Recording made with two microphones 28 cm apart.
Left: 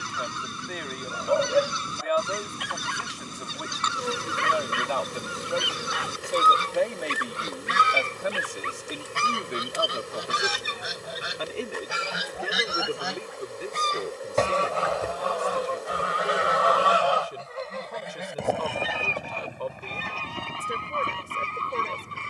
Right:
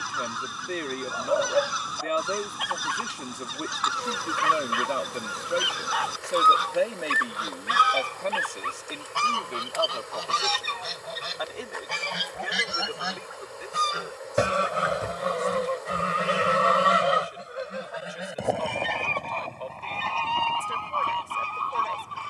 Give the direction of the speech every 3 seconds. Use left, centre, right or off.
right, right, centre, left, left, left, left, left.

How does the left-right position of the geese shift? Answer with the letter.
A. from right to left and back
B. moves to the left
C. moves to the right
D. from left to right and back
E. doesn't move
D.